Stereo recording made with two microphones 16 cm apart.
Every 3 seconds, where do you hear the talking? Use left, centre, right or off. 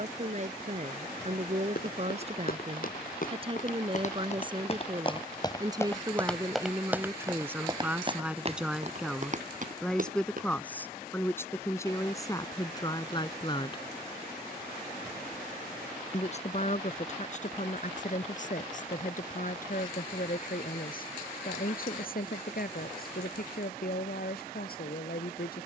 right, right, centre, centre, left, left, left, left, left.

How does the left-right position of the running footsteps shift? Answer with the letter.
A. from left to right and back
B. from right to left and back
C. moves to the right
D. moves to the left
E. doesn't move
C.